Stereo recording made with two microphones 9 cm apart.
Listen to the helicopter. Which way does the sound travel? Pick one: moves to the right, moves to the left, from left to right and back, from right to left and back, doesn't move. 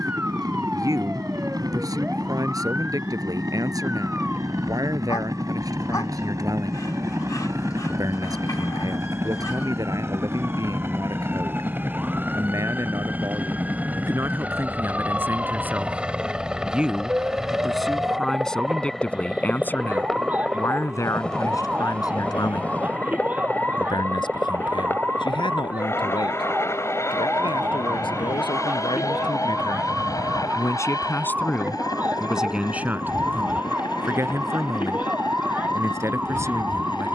moves to the left.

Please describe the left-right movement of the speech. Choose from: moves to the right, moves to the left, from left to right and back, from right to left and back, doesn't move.
from right to left and back.